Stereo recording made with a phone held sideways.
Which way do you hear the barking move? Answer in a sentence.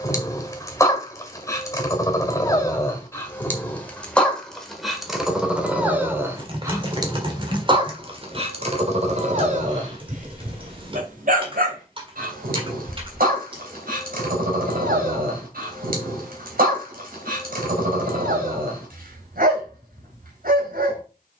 In this clip you hear the barking go from the left side to the right.